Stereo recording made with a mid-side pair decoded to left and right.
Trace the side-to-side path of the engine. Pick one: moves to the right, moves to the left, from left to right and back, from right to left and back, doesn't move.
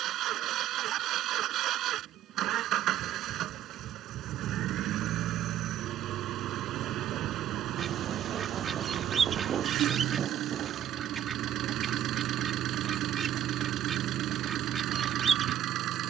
doesn't move.